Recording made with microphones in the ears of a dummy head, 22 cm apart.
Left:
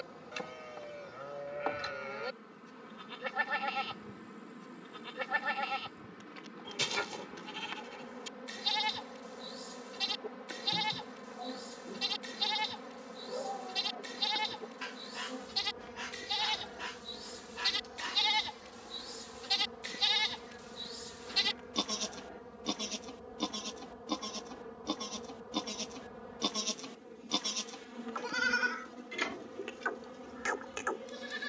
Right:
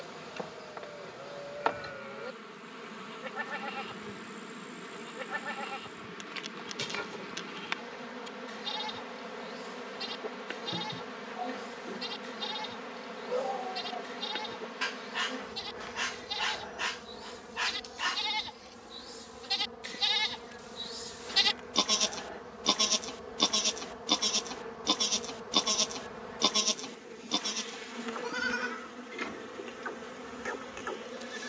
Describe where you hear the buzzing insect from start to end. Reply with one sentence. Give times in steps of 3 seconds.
You can hear the buzzing insect on the right from 0 s, in the centre from 18 s and on the right from 21 s.